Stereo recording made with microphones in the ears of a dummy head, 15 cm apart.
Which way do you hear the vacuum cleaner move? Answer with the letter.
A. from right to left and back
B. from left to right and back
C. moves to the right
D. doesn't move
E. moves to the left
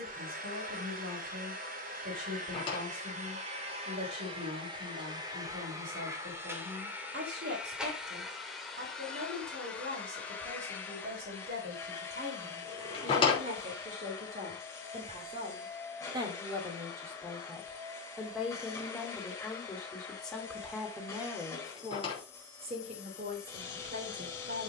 E.